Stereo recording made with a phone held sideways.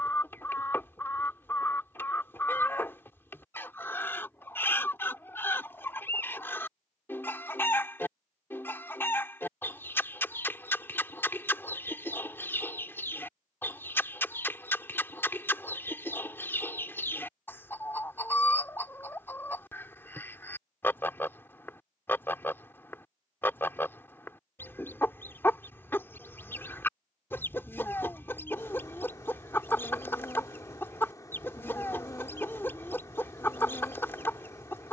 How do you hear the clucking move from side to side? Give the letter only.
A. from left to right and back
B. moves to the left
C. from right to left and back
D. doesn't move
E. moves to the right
D.